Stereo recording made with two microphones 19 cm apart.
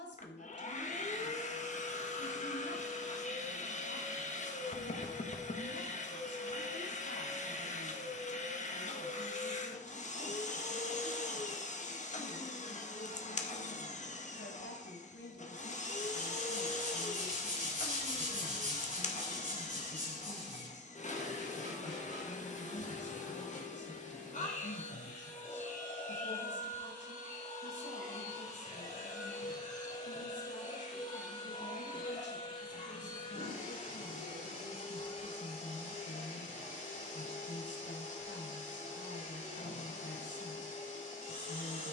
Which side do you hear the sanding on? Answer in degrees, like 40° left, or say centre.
40° right.